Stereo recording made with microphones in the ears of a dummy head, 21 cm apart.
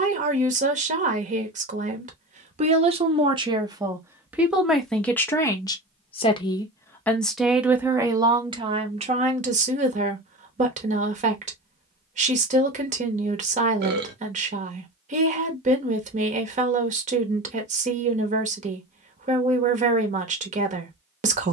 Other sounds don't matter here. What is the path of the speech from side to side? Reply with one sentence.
You can hear the speech go left and come back.